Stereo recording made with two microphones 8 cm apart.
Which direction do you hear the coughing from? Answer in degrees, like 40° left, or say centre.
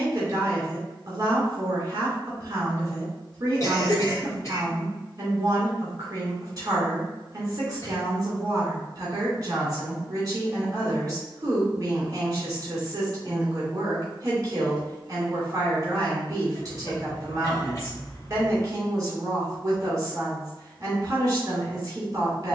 40° left.